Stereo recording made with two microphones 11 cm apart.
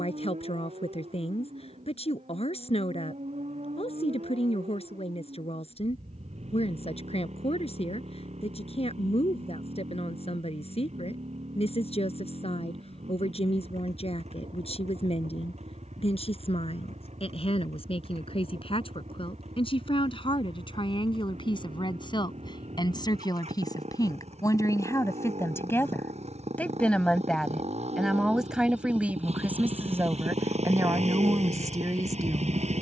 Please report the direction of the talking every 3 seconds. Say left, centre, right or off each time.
left, left, left, left, left, left, left, left, left, centre, right.